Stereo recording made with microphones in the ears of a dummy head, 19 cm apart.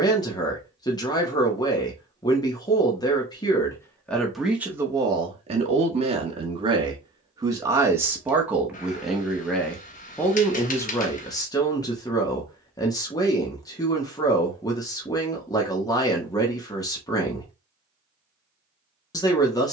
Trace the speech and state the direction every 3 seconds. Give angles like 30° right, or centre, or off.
20° left, 10° right, 20° right, 10° left, 20° left, 20° left, 20° left.